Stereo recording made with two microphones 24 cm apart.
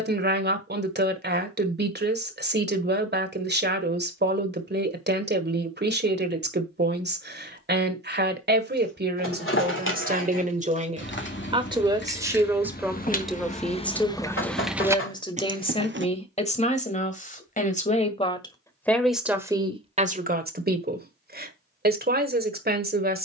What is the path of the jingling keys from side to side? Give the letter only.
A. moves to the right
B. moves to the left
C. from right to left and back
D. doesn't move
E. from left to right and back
A.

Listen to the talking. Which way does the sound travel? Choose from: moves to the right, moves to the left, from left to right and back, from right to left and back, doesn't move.
from right to left and back.